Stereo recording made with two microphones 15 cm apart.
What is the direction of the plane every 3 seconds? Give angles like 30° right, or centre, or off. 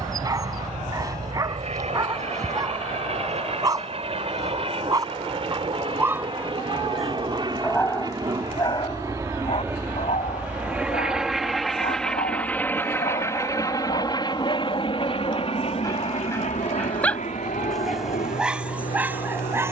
50° right, 40° right, 30° right, 10° right, 20° left, 50° left, 60° left.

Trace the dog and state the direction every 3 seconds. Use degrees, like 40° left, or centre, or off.
30° right, 20° right, 10° left, 50° left, 50° left, 20° left, 10° right.